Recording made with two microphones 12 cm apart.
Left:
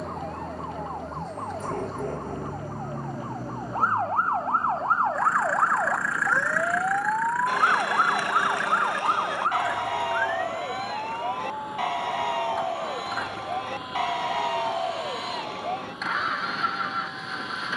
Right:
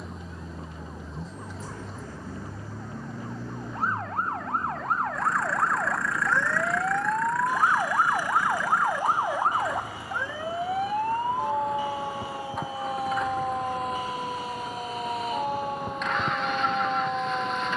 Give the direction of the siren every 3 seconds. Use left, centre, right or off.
left, left, centre, right, right, right.